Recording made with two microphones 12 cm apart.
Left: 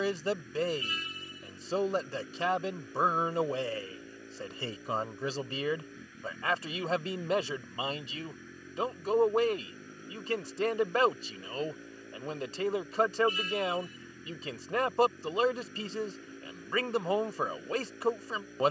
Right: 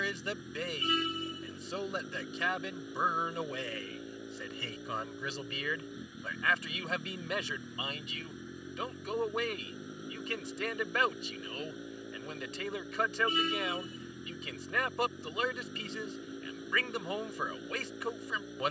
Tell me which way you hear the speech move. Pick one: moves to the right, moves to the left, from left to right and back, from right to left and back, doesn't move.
doesn't move.